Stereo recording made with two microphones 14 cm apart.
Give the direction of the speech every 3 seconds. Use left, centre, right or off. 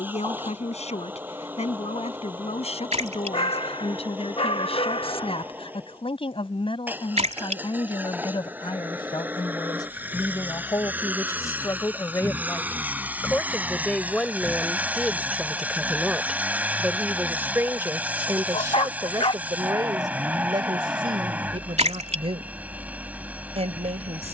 left, left, left, left, centre, centre, right, right.